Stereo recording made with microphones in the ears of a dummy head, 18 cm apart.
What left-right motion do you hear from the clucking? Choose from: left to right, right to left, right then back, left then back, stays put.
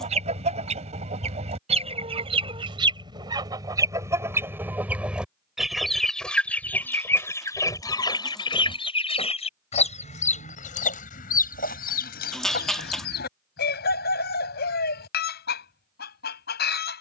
right to left.